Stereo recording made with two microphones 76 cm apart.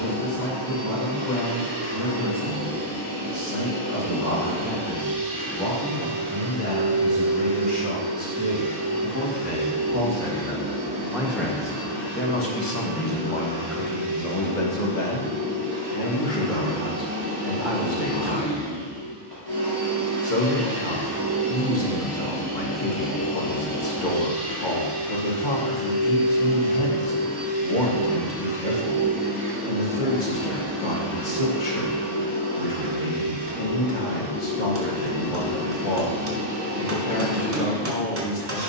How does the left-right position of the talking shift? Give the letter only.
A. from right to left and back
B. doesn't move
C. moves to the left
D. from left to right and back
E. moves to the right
C.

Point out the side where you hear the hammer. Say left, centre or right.
right.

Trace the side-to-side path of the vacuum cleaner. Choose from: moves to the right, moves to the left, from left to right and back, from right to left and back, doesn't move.
from right to left and back.